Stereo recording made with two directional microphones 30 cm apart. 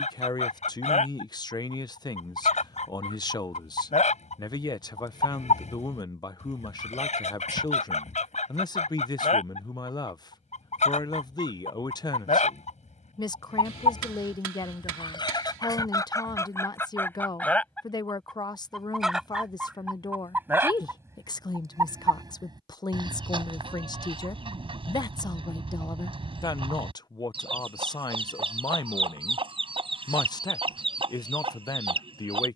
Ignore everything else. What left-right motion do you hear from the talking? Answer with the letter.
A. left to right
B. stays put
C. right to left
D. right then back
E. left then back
B.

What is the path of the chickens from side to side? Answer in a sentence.
In this clip you hear the chickens move to the right.